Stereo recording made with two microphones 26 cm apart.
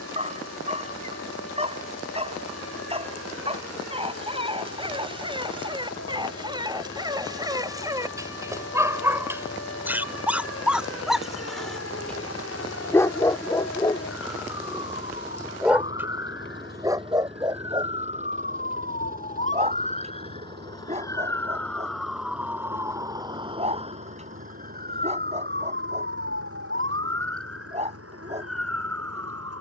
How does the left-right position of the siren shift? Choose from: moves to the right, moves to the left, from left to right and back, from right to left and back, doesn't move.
moves to the right.